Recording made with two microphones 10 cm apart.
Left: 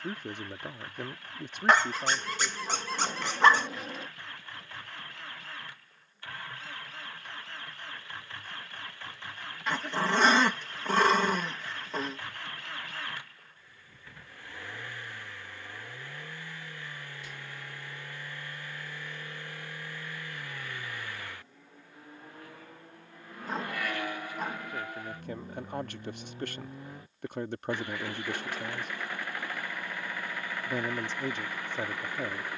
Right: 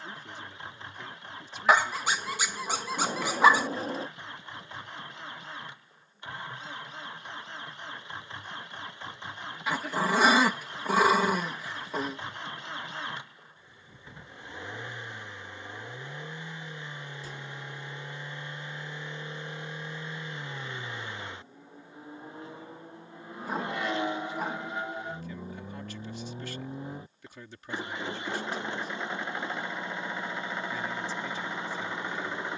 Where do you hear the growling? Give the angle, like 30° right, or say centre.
10° right.